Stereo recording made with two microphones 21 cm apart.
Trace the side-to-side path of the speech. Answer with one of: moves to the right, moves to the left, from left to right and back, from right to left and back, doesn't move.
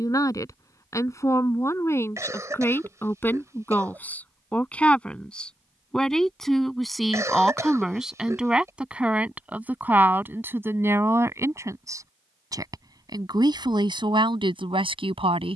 moves to the right.